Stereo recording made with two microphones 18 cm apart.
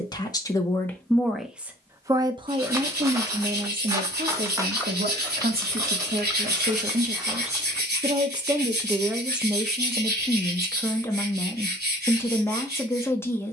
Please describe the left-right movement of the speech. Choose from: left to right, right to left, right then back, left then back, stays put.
right then back.